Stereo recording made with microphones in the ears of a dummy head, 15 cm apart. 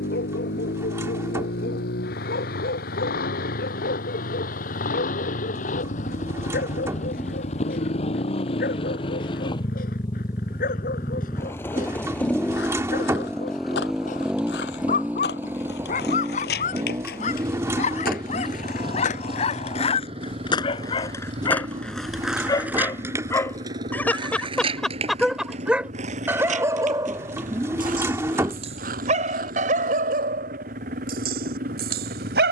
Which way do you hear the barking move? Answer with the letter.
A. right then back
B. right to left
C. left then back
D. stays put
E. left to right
E.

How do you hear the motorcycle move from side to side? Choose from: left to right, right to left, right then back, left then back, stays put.
left to right.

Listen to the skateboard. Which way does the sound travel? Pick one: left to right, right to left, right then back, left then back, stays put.
left to right.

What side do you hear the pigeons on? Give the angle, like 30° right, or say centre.
20° right.